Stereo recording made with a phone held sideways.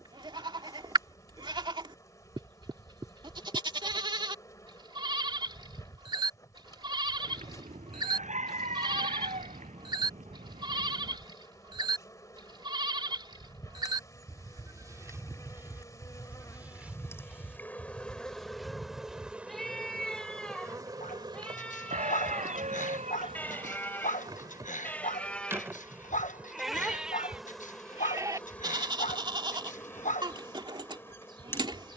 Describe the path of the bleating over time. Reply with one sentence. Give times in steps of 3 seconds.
You can hear the bleating on the right from 0 s, in the centre from 15 s and on the right from 27 s.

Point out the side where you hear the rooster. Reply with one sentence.
You can hear the rooster on the right.